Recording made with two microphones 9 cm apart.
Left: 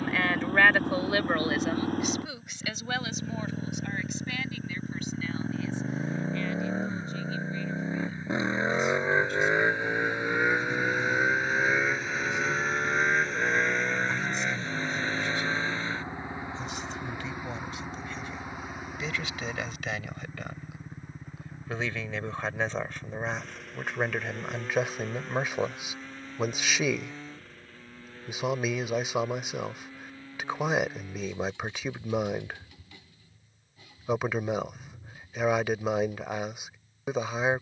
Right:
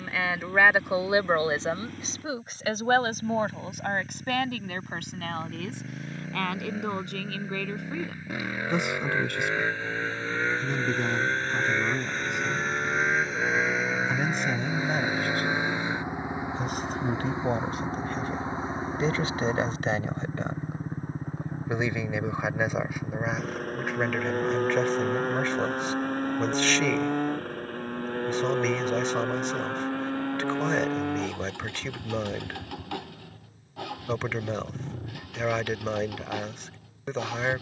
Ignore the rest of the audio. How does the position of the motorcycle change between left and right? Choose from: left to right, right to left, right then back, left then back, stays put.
left to right.